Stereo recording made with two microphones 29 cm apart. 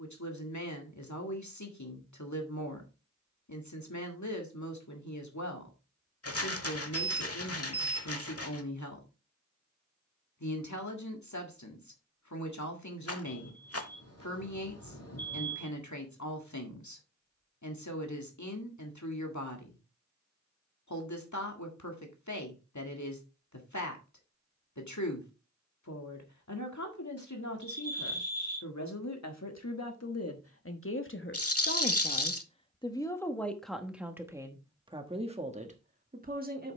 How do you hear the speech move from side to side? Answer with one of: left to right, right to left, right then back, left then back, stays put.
left to right.